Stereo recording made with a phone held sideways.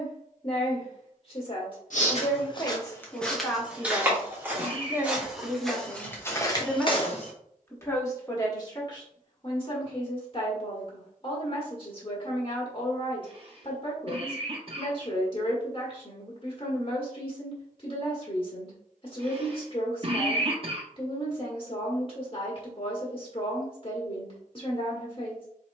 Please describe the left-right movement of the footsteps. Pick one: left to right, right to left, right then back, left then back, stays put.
right then back.